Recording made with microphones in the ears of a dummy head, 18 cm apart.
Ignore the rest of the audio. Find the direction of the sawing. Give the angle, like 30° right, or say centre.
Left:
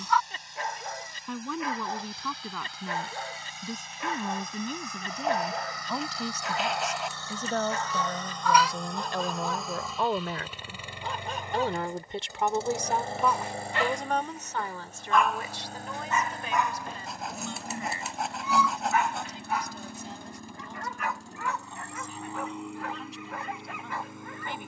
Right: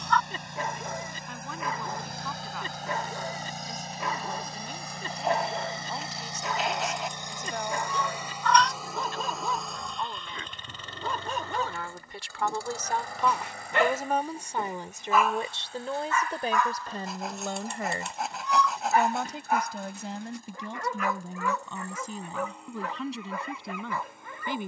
centre.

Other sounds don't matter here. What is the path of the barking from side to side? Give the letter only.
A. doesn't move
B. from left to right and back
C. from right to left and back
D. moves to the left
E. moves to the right
C.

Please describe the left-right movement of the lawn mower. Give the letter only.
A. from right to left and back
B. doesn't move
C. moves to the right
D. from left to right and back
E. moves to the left
E.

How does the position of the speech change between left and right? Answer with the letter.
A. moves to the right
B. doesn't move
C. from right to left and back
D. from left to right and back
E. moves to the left
A.